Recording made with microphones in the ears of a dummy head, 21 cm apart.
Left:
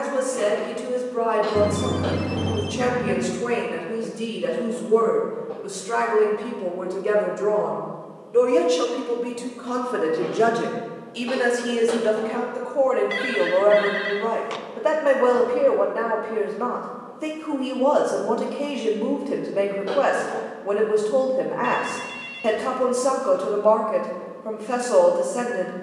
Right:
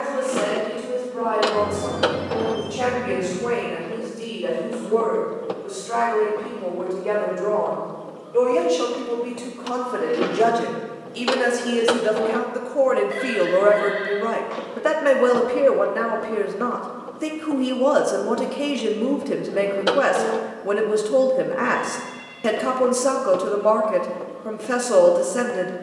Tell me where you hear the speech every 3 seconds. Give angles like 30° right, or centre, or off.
40° left, 40° left, 30° left, 10° left, 20° right, 20° right, 20° right, 20° right, 20° right.